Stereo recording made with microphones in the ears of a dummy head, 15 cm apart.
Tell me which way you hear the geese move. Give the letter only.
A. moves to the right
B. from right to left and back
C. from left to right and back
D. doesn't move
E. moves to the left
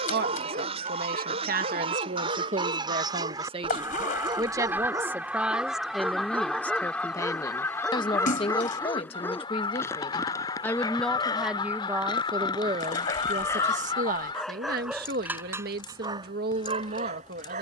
E.